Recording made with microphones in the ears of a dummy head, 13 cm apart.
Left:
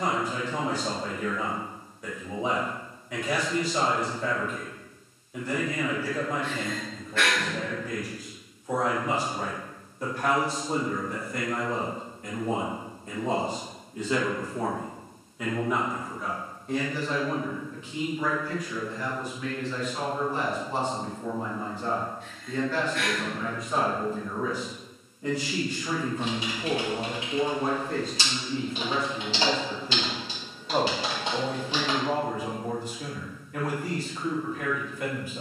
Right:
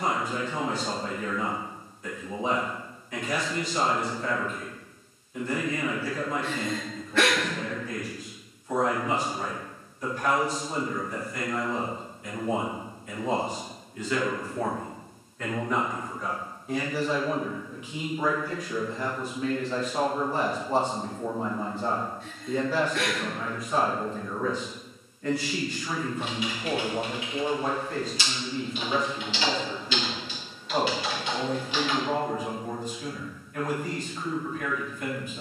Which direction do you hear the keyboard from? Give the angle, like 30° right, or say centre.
30° left.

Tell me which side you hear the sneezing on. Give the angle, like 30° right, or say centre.
60° right.